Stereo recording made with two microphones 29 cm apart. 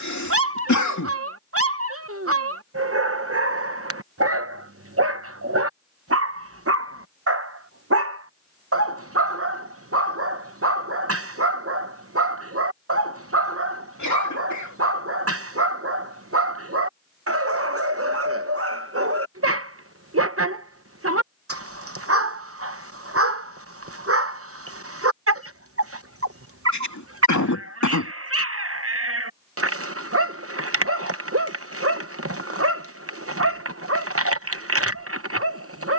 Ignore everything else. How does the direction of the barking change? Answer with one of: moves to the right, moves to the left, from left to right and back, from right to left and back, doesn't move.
doesn't move.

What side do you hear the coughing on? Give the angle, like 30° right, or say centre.
80° left.